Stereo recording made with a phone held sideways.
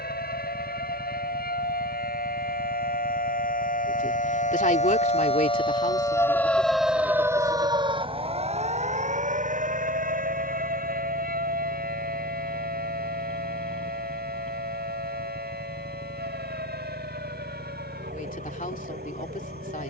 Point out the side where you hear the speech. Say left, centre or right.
left.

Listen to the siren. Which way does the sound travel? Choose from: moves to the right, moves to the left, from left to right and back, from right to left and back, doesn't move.
moves to the right.